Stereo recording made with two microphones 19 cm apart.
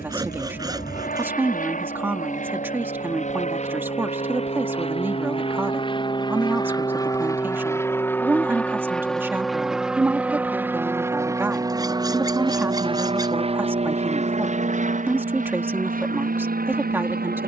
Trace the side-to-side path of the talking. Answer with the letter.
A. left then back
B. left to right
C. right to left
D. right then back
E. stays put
E.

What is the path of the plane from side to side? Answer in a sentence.
You can hear the plane go from the left side to the right.